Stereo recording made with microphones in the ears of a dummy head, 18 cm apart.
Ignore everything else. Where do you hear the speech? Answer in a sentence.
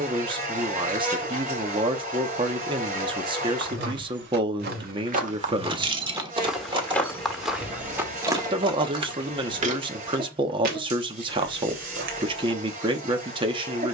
In this clip you hear the speech on the right.